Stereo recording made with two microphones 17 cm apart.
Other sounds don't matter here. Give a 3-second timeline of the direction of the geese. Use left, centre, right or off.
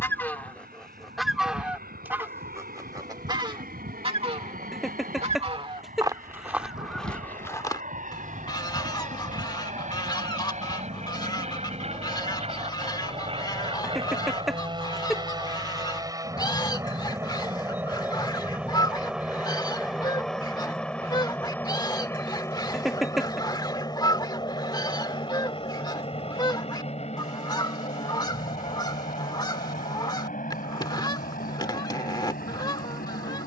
centre, right, centre, left, left, left, left, left, left, left, left.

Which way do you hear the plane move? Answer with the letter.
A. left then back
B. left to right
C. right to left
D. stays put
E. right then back
C.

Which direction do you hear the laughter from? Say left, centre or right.
centre.